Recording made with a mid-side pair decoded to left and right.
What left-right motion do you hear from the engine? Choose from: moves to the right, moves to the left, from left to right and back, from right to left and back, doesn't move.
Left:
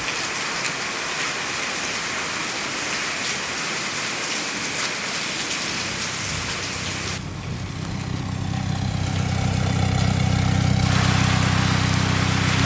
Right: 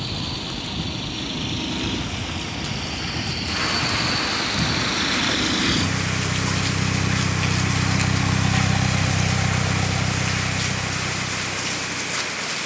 moves to the left.